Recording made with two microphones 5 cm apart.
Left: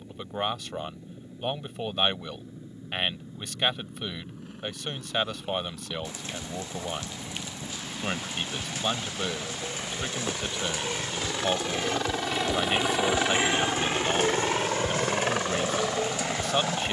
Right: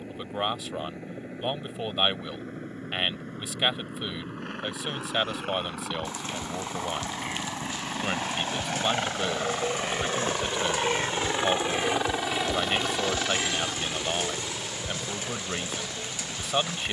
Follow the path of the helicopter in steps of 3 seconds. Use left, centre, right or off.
right, right, right, right, left, left.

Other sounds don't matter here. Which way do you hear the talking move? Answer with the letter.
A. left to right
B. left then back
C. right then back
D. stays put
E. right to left
D.